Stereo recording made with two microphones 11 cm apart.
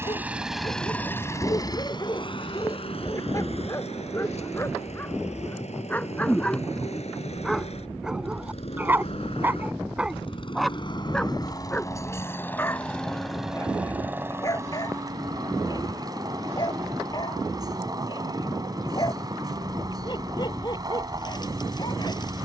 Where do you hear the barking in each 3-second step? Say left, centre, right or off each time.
left, left, centre, centre, left, left, left, left.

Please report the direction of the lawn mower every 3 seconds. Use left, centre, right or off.
left, left, left, left, centre, right, right, right.